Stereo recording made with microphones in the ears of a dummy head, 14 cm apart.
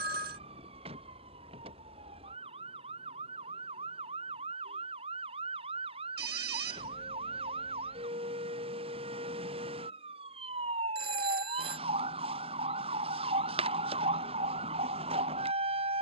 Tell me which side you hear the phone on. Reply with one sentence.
In this clip you hear the phone on the right.